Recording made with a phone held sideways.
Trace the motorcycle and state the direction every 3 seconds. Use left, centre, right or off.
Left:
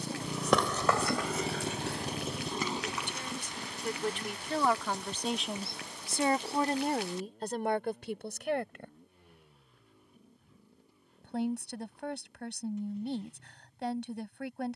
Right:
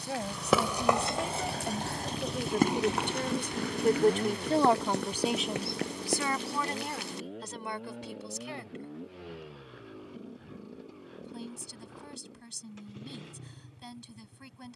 left, right, right, right, right.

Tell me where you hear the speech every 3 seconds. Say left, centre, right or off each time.
right, right, left, left, left.